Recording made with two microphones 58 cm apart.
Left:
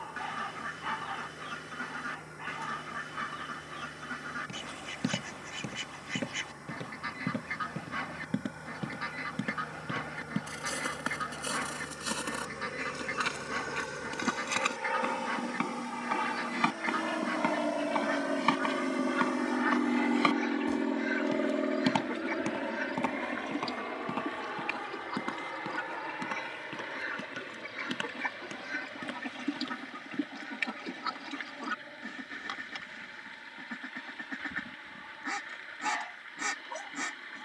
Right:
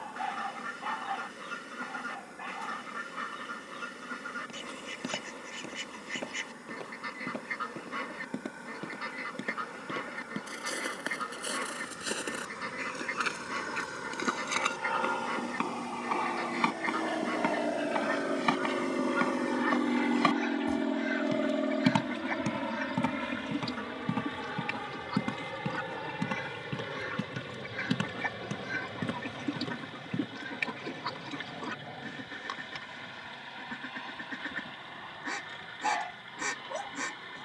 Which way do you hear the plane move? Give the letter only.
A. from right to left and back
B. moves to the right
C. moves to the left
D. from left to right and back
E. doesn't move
B.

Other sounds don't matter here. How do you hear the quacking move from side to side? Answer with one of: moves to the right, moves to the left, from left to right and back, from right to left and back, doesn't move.
from left to right and back.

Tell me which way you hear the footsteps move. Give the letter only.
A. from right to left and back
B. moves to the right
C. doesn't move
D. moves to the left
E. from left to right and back
B.